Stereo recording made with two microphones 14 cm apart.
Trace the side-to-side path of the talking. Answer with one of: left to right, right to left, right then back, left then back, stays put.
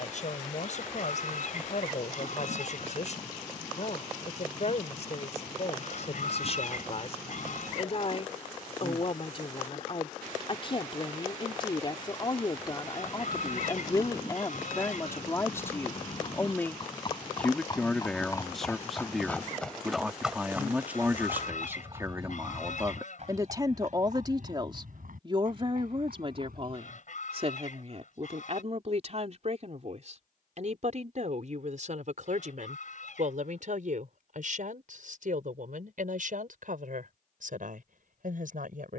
left to right.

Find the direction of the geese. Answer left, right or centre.
left.